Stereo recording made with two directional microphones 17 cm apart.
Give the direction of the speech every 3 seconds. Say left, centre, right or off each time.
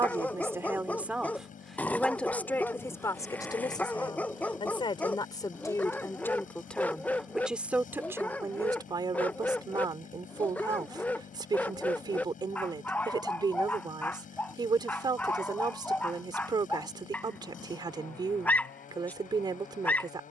centre, left, centre, right, right, right, right.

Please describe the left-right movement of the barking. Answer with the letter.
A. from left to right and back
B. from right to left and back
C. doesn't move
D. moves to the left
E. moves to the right
C.